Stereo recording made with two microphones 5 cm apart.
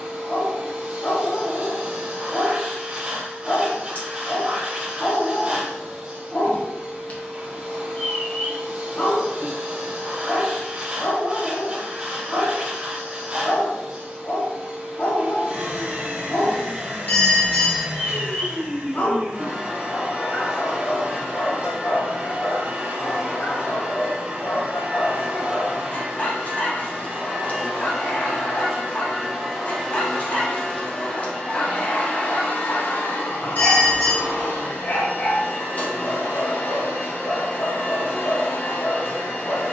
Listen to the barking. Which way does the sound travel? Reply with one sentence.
You can hear the barking stay put.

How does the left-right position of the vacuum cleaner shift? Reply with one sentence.
In this clip you hear the vacuum cleaner move from right to left.